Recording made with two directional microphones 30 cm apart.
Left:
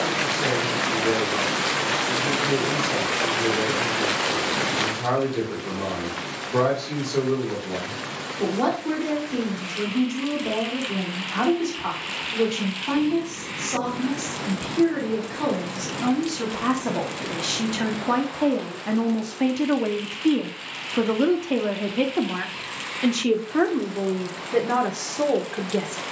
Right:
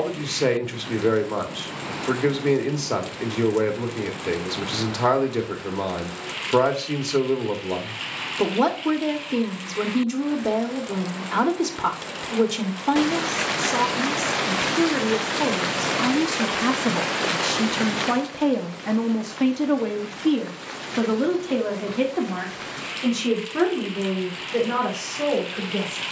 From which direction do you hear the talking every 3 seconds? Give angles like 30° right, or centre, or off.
60° right, 60° right, 60° right, 60° right, 60° right, 50° right, 10° right, 30° left, 40° left.